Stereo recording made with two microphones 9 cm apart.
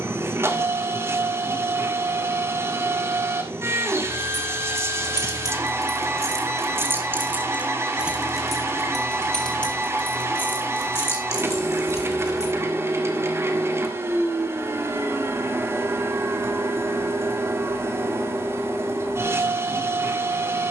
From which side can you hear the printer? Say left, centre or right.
right.